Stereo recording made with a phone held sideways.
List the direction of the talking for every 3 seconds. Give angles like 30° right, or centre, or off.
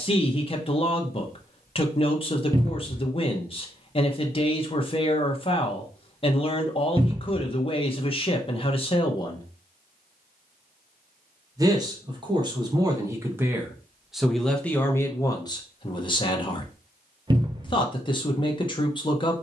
30° left, 30° left, 30° left, centre, 10° right, 30° left, 30° left.